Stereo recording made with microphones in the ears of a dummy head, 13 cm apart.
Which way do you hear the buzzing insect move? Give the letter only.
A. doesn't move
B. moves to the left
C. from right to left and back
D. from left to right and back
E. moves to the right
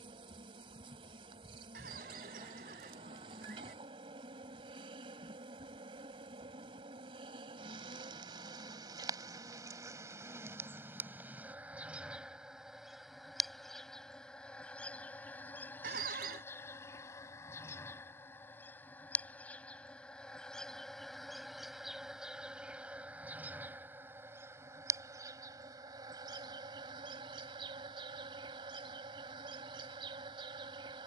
C.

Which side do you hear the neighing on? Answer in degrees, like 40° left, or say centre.
70° right.